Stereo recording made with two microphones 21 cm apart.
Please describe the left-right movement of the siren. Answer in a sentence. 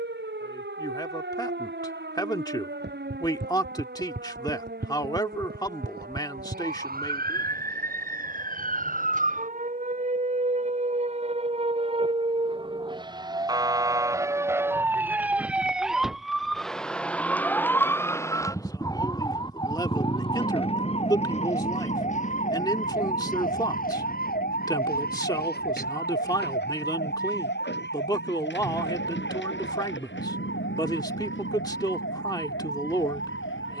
You can hear the siren move to the left.